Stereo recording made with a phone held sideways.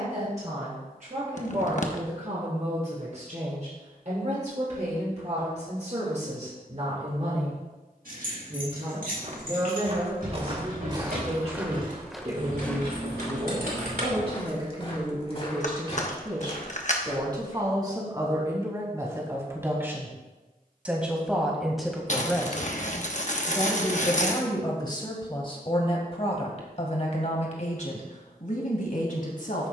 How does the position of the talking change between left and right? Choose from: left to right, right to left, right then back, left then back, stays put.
right to left.